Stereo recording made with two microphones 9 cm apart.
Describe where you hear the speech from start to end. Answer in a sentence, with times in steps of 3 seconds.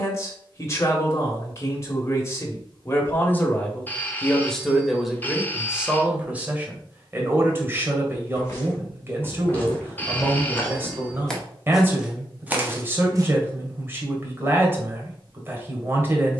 In this clip you hear the speech on the left from 0 s, in the centre from 3 s and on the right from 6 s.